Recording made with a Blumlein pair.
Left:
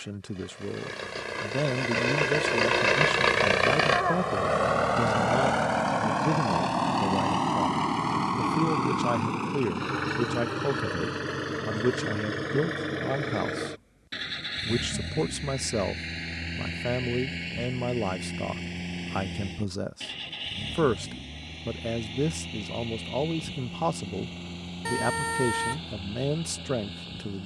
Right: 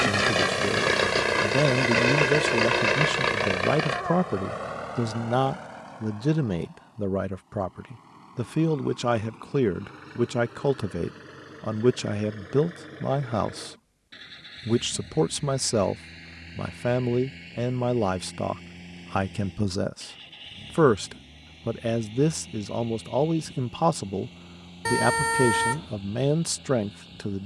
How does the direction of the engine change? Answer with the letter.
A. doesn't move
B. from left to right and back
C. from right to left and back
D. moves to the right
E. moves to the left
E.